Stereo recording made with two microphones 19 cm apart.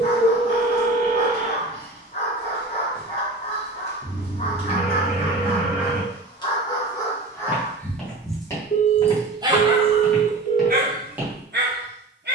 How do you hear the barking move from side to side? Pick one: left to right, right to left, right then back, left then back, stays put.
left to right.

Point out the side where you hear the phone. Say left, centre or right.
left.